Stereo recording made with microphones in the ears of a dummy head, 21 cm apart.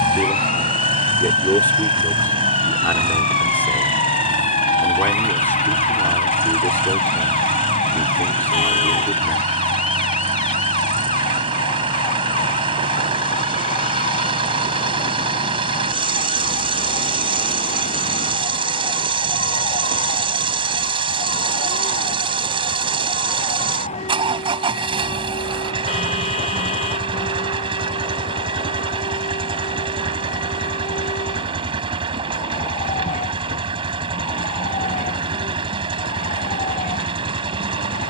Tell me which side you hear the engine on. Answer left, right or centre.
right.